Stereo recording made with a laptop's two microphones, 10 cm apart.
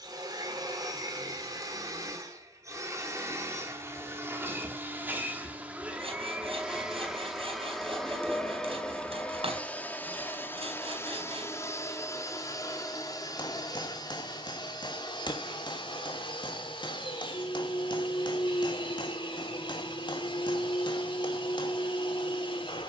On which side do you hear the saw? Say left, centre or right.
right.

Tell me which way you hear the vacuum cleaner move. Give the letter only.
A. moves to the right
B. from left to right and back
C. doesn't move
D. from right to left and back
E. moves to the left
E.